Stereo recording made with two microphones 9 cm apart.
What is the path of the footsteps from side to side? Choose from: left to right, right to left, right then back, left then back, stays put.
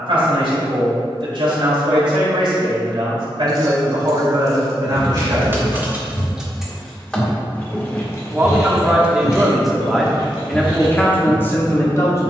left to right.